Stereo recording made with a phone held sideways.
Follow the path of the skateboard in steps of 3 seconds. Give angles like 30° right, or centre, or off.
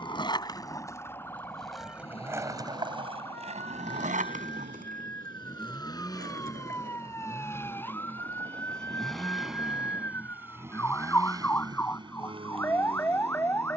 centre, 60° right, 80° right, off, off.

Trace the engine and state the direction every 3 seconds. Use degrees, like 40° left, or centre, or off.
40° left, 40° left, 20° left, 10° right, 40° right.